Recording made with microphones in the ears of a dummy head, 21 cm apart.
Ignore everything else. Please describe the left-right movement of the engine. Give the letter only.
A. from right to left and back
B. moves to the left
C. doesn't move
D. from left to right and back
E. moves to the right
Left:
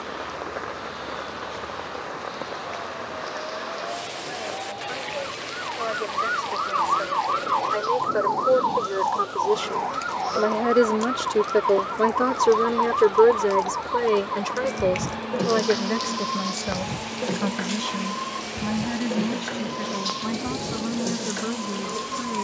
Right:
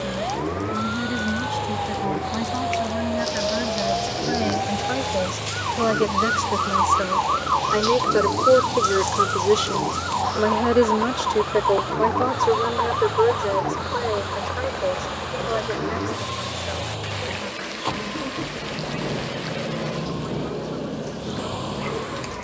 C.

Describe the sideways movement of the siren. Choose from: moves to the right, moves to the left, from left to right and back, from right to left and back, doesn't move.
moves to the left.